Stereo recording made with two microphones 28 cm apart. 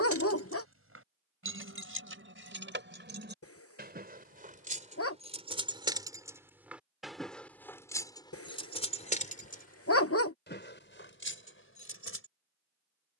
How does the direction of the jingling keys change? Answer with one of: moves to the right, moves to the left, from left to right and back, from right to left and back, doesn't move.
moves to the left.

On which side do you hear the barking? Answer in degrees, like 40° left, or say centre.
50° left.